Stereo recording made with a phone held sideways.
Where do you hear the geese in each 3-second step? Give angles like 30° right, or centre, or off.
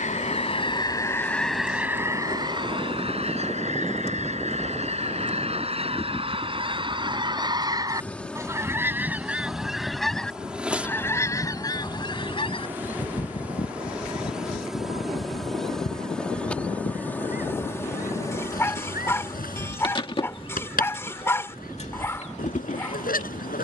centre, 40° right, 30° right, 10° left, 40° left, 70° left, 70° left, 70° left.